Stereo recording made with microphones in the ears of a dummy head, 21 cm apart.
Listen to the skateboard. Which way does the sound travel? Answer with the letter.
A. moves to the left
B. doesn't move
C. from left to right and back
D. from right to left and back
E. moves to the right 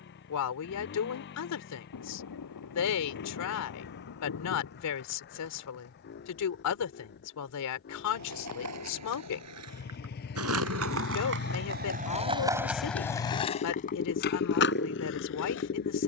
A.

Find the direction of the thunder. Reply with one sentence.
In this clip you hear the thunder on the left.